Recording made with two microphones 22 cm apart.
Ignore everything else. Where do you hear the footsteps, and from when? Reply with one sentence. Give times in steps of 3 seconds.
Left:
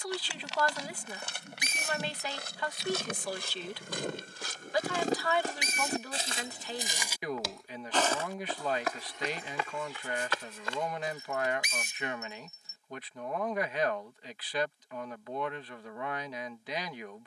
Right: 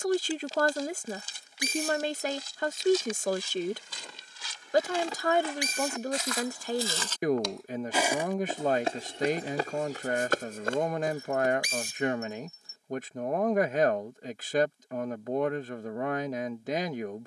In this clip you hear the footsteps on the left from 0 s, in the centre from 6 s, on the right from 9 s and not at all from 12 s.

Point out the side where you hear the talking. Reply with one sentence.
In this clip you hear the talking on the right.